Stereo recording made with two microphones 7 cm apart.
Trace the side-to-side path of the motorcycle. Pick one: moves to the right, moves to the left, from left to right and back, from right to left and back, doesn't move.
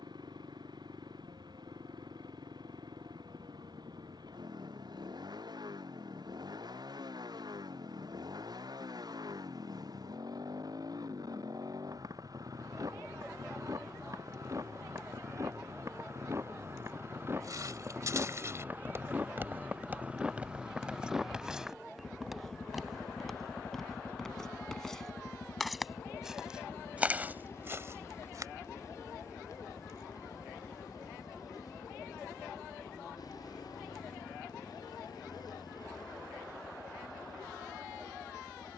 moves to the left.